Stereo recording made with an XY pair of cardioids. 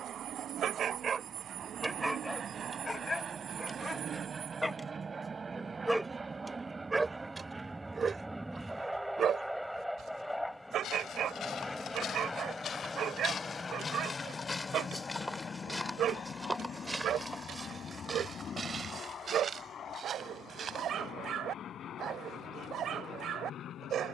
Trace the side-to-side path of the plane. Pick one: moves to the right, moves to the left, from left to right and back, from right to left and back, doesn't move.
moves to the left.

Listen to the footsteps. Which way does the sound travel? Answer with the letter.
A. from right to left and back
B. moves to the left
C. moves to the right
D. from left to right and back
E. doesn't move
C.